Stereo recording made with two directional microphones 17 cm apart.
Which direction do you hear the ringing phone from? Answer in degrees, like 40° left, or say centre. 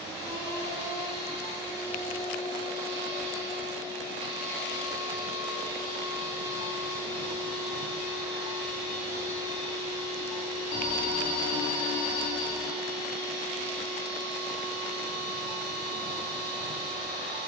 70° left.